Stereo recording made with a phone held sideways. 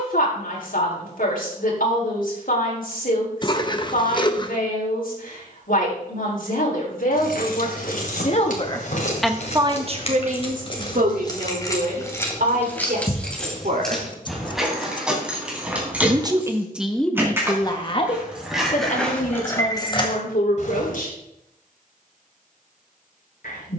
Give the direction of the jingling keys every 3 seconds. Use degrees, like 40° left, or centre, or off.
off, off, 70° left, 40° left, 10° left, 10° right, 20° left, off.